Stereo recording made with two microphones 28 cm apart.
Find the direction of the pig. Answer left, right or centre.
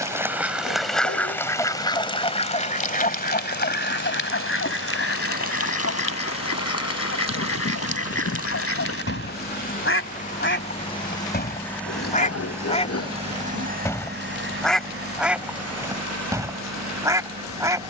left.